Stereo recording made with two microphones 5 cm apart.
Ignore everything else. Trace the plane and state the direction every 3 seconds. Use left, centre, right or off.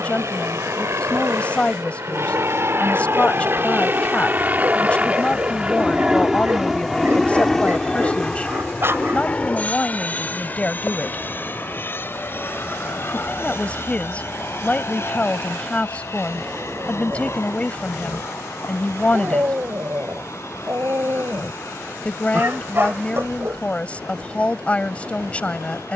right, right, centre, left, left, left, left, left, left.